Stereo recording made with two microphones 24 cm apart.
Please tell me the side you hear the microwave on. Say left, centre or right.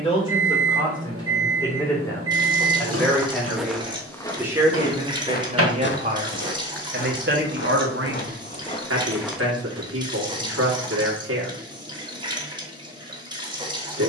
right.